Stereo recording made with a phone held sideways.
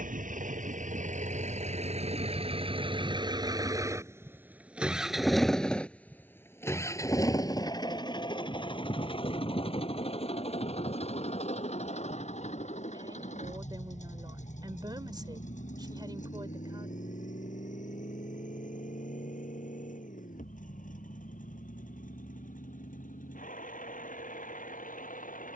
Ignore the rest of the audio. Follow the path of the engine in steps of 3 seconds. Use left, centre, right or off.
right, centre, left, left, left, left, left, left, left.